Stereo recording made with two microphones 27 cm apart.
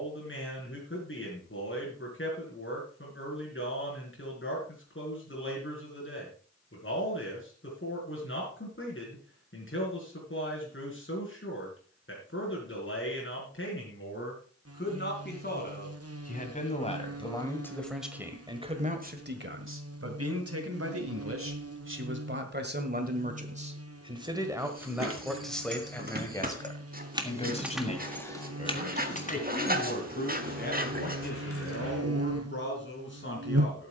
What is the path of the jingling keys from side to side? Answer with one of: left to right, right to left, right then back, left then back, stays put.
right to left.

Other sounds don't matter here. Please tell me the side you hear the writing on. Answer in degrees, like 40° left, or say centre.
30° right.